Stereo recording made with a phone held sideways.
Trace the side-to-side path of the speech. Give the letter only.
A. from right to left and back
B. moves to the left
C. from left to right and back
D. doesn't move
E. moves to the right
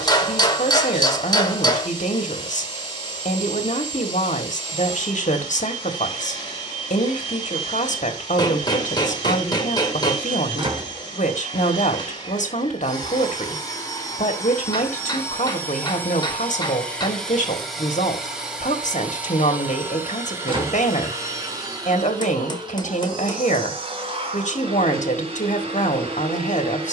D.